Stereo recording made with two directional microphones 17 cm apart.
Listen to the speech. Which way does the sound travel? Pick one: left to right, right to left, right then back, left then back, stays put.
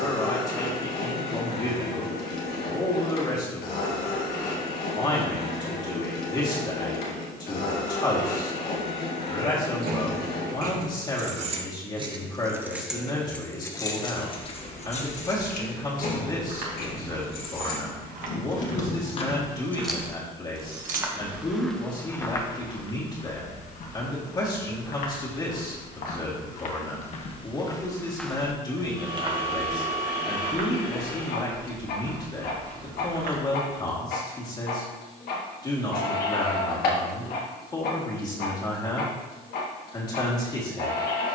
stays put.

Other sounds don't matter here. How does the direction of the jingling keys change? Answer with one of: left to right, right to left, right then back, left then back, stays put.
left then back.